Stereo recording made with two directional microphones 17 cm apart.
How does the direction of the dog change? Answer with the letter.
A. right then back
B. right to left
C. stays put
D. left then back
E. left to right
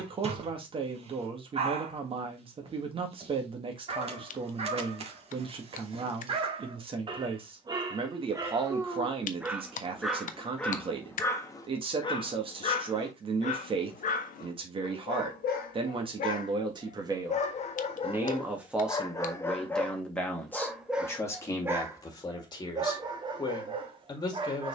D.